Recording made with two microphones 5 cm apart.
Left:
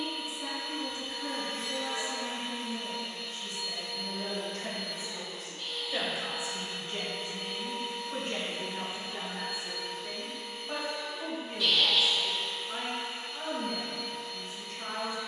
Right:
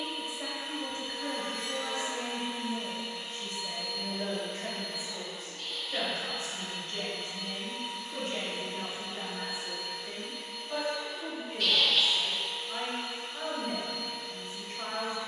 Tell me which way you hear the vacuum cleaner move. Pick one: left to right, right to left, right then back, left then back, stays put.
right to left.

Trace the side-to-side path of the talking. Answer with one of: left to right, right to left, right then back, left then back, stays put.
left then back.